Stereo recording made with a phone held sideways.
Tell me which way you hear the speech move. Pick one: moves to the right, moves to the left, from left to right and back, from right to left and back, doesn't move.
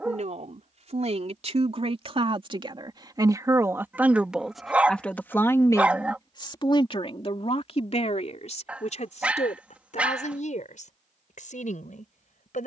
moves to the left.